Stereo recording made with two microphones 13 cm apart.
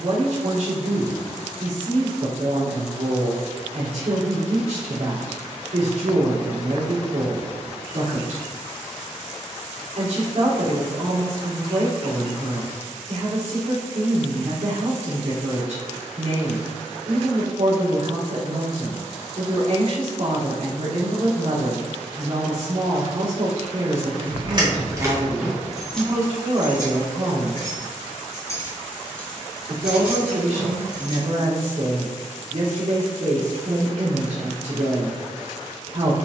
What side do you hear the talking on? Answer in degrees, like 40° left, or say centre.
70° right.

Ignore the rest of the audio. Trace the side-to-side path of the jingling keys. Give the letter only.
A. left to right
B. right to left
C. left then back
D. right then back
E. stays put
C.